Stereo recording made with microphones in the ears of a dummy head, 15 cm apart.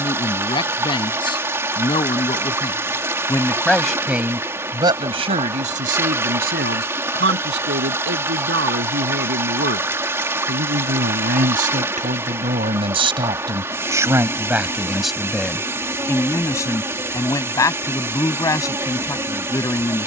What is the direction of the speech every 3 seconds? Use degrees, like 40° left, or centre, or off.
30° left, 20° right, 70° right, 60° right, 20° right, 10° left, 20° left.